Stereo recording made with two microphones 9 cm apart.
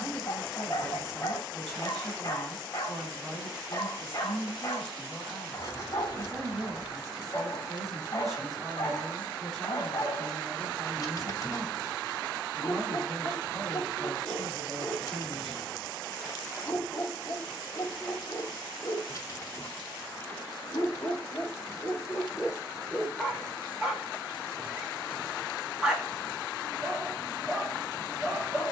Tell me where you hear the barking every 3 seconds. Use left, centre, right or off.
left, left, left, left, left, left, left, centre, centre, centre.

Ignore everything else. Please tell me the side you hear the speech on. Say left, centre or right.
centre.